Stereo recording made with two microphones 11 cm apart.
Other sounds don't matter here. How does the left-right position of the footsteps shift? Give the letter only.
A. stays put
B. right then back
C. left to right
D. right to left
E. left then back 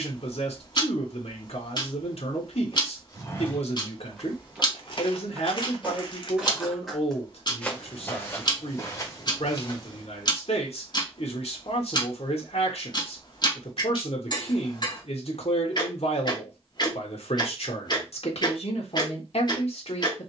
B.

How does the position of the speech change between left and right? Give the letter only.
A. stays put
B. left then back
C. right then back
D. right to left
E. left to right
A.